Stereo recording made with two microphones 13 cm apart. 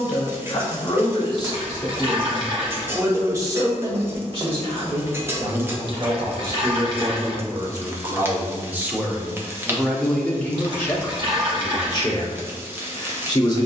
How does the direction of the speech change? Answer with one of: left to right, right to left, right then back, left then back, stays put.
right then back.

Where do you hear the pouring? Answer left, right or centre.
right.